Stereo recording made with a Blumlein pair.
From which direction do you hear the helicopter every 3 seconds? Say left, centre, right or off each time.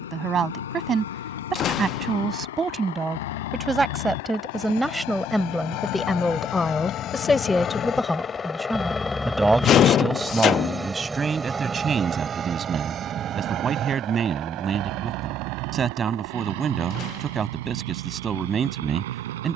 left, left, left, centre, right, right, right.